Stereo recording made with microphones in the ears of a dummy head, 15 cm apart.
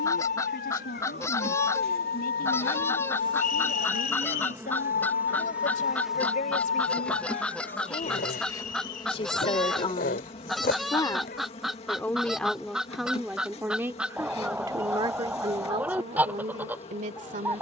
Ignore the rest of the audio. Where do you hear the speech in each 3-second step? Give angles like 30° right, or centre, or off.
60° left, 50° left, 50° left, 30° left, 10° right, 40° right.